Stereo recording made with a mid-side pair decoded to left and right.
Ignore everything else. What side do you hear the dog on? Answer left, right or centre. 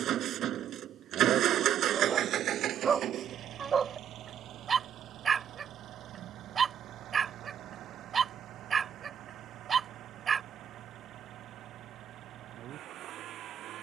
right.